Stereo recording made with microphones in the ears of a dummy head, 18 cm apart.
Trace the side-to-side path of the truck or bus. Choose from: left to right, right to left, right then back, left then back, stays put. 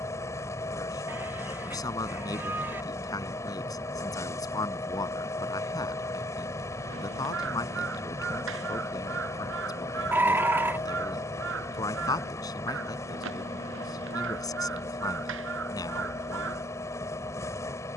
stays put.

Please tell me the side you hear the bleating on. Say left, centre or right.
centre.